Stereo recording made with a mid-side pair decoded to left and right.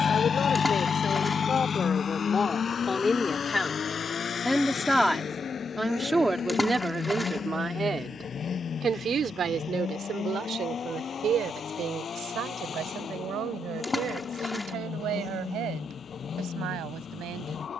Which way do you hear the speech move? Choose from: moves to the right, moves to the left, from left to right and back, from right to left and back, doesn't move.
moves to the right.